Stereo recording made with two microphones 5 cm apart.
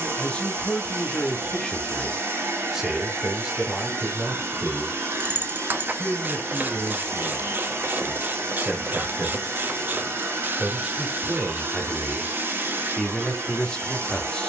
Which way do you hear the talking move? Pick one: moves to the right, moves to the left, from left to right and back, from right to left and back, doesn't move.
from left to right and back.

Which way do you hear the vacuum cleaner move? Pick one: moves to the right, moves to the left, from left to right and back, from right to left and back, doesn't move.
doesn't move.